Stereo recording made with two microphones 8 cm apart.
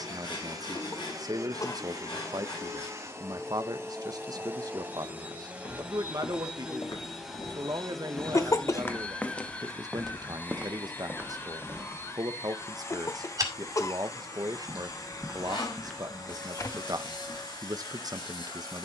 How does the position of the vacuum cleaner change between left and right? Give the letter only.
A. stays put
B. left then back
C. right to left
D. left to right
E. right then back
C.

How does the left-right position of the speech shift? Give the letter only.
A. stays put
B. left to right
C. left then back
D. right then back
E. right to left
A.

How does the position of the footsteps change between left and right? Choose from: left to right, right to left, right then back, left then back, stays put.
right then back.